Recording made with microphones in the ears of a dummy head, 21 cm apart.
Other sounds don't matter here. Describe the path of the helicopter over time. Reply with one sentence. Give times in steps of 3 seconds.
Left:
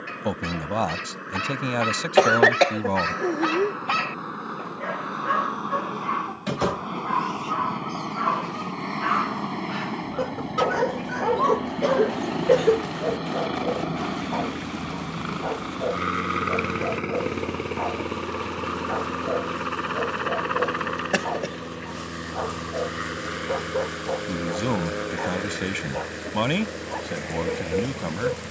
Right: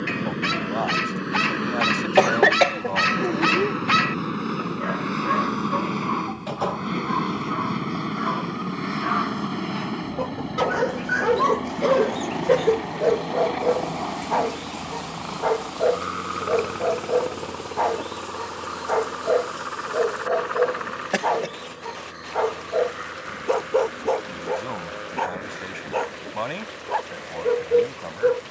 You can hear the helicopter on the right from 0 s, in the centre from 9 s and on the left from 15 s.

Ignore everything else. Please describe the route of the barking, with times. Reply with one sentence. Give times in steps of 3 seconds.
You can hear the barking on the right from 0 s, in the centre from 3 s, on the left from 6 s, in the centre from 9 s and on the right from 12 s.